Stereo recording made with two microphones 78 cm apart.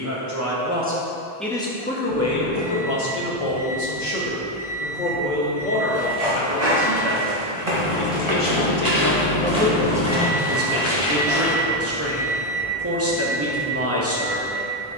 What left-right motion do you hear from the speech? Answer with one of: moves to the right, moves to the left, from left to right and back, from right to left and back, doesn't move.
from right to left and back.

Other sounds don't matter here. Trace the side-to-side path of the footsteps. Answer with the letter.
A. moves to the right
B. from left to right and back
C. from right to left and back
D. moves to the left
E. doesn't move
D.